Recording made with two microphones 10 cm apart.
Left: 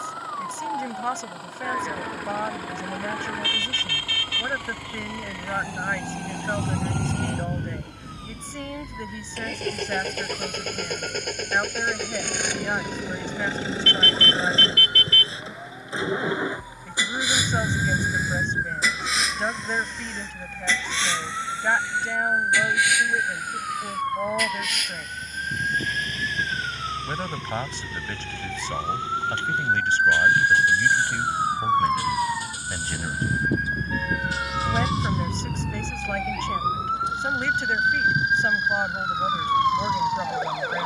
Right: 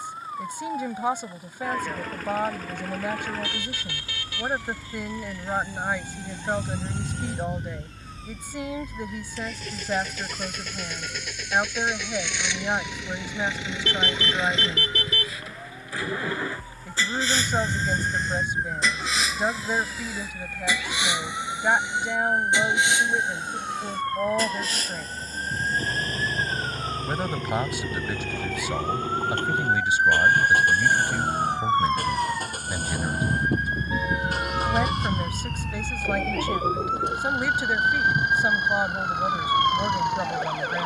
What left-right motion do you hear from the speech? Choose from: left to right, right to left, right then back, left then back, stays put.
stays put.